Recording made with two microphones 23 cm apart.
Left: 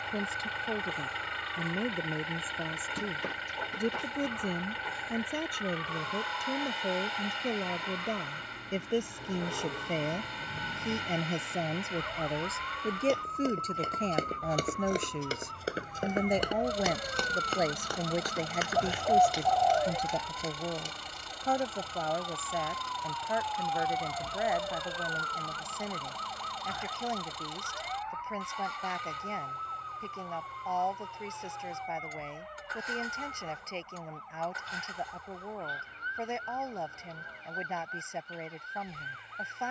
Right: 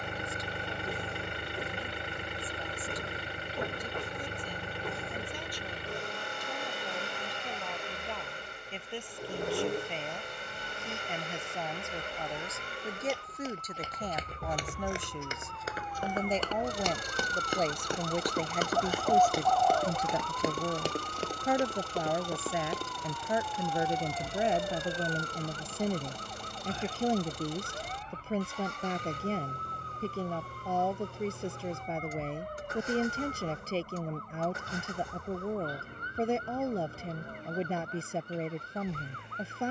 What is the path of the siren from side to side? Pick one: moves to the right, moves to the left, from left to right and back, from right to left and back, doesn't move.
moves to the right.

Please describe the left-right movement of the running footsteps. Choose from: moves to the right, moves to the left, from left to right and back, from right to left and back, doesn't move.
moves to the right.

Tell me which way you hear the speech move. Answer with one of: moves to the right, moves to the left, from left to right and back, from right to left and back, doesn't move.
moves to the right.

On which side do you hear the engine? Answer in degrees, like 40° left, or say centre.
50° right.